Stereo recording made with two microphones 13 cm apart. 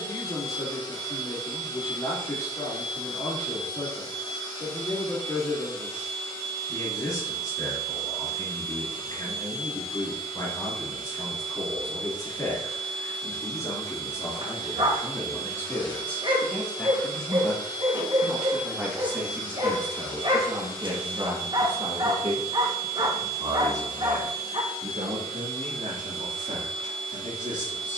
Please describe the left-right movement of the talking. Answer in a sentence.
You can hear the talking travel towards the right.